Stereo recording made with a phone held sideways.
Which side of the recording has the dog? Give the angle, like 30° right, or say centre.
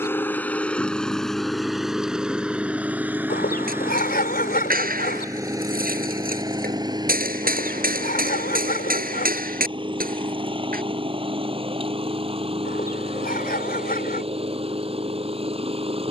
70° left.